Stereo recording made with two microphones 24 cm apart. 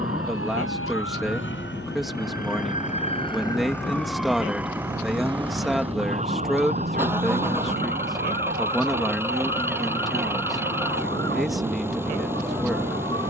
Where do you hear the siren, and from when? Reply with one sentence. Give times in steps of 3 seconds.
You can hear the siren on the left from 0 s, in the centre from 3 s and on the right from 6 s.